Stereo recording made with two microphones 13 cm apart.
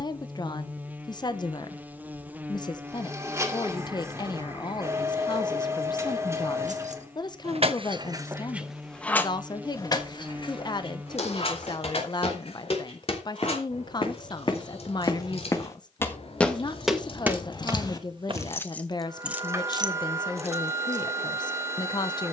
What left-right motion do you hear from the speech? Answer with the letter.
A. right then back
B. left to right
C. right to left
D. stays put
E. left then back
D.